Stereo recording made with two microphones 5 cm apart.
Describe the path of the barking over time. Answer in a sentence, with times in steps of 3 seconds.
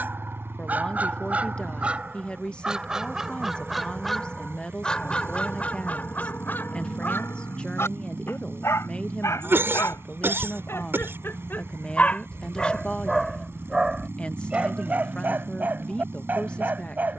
In this clip you hear the barking on the right from 0 s, in the centre from 3 s, on the left from 6 s, in the centre from 12 s and on the right from 15 s.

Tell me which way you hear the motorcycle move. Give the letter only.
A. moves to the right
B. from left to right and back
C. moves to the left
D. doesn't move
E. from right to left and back
D.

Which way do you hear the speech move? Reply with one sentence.
You can hear the speech stay put.